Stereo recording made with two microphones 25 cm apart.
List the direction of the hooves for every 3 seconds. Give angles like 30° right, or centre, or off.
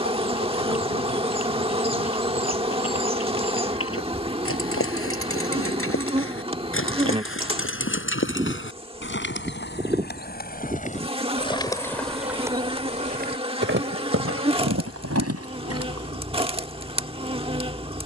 70° left, 60° left, 60° left, 40° left, 40° right, 80° right.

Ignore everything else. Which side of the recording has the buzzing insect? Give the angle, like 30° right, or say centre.
20° right.